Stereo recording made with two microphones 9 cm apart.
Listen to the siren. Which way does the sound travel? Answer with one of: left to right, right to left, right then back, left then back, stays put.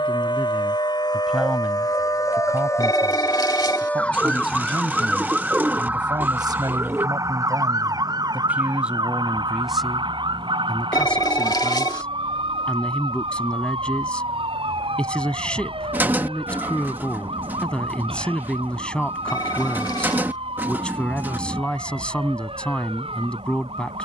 left to right.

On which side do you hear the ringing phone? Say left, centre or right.
left.